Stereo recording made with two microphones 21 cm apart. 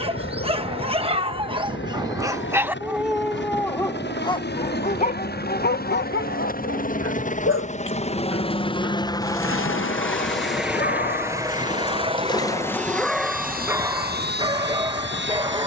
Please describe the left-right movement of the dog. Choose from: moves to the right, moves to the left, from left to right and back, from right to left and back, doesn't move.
from right to left and back.